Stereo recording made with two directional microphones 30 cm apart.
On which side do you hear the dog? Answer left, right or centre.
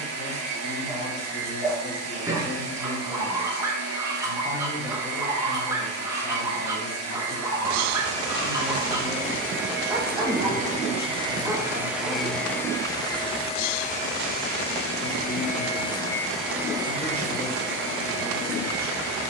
centre.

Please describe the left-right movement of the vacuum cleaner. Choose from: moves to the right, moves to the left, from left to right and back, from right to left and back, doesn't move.
from right to left and back.